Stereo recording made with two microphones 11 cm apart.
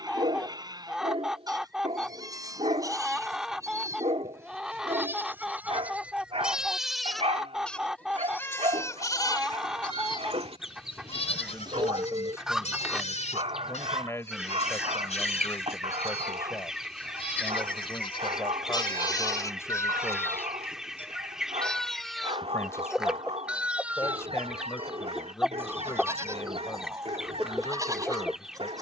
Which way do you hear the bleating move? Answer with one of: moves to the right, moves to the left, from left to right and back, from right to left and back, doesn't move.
from right to left and back.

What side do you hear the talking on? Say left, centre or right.
left.